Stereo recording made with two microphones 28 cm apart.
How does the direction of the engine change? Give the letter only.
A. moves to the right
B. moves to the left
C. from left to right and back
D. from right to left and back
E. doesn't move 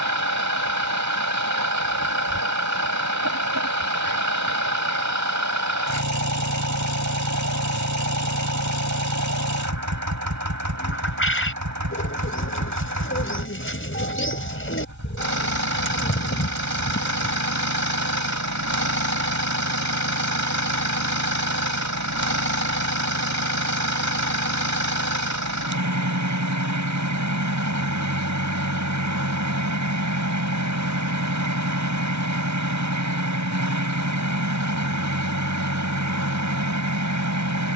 E.